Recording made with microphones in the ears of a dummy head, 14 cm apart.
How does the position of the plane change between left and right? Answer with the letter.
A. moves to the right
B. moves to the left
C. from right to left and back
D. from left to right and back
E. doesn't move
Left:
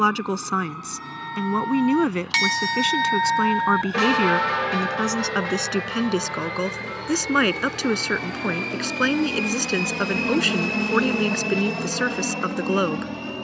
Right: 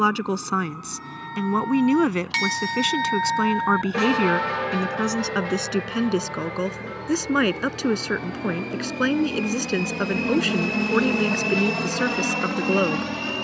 A.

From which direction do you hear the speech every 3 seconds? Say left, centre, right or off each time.
centre, centre, left, left, left.